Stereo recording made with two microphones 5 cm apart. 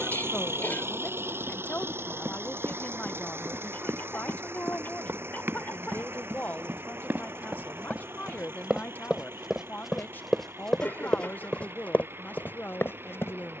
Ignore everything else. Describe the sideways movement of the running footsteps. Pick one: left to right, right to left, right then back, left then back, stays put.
right to left.